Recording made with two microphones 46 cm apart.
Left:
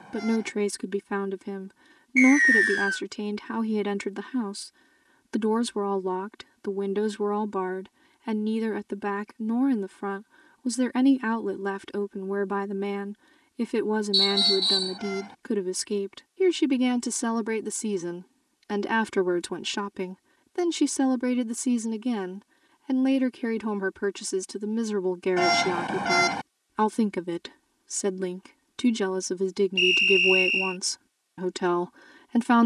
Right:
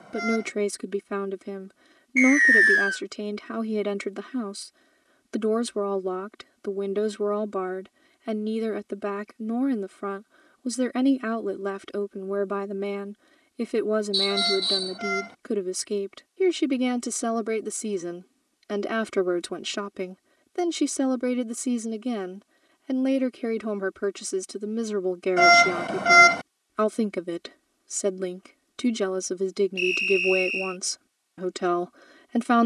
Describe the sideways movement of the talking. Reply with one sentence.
In this clip you hear the talking stay put.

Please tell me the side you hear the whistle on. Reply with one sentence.
You can hear the whistle on the left.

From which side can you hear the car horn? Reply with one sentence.
You can hear the car horn in the centre.